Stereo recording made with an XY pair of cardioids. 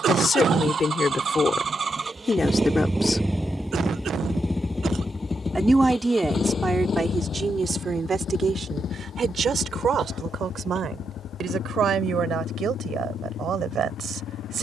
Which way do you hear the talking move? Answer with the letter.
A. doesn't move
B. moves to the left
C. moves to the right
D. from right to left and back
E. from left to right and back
C.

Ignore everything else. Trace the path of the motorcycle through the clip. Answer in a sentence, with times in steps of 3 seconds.
In this clip you hear the motorcycle on the right from 0 s, in the centre from 3 s and on the left from 6 s.